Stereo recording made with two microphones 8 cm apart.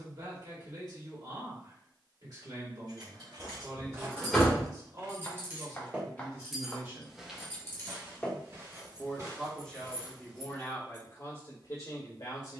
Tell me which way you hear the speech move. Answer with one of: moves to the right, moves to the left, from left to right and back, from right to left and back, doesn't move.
moves to the left.